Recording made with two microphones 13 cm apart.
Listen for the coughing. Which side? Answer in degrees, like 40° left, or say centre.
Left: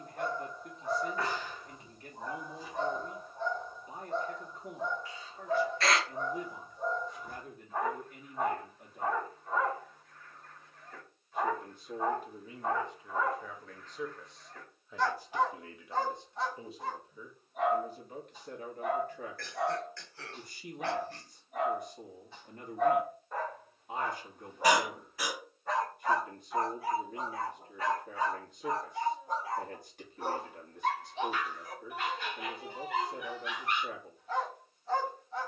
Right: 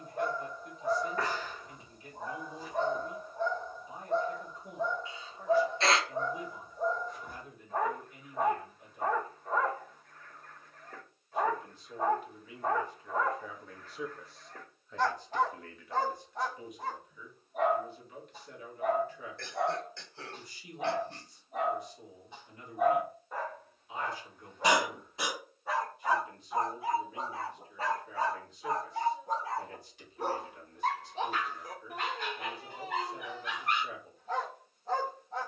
20° right.